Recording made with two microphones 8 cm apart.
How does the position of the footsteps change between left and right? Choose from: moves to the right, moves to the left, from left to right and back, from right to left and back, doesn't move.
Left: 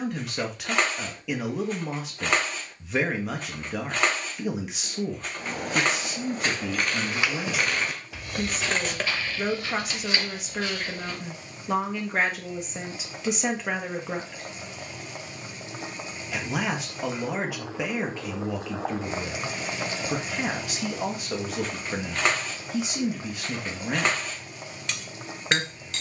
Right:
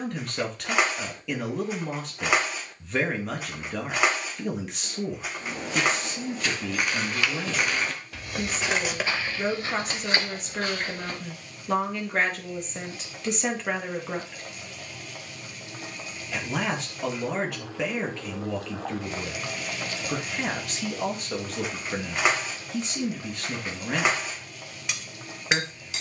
moves to the right.